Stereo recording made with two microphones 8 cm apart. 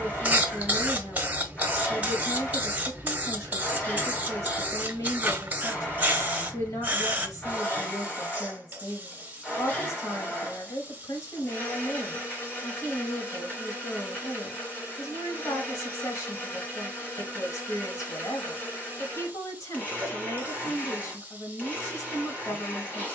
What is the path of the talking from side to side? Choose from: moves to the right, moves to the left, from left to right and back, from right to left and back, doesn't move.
doesn't move.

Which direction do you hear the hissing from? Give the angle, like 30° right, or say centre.
20° right.